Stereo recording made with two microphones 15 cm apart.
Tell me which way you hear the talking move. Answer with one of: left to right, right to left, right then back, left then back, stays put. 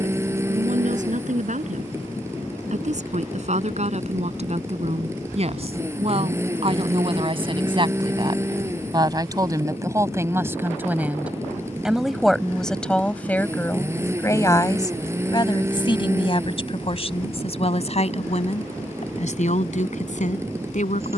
right to left.